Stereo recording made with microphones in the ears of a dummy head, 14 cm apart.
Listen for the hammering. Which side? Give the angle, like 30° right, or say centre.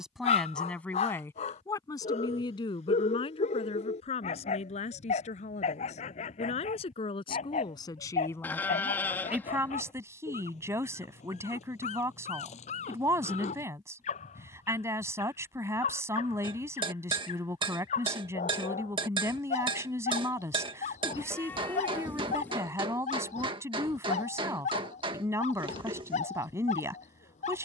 30° right.